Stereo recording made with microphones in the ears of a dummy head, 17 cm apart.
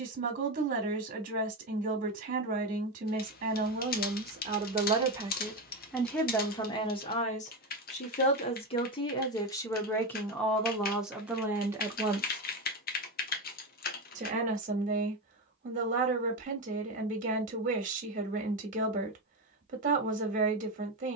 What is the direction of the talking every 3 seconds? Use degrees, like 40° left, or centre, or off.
50° right, 30° right, 30° left, centre, 30° right, 40° right, 40° right.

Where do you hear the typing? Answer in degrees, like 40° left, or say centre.
50° left.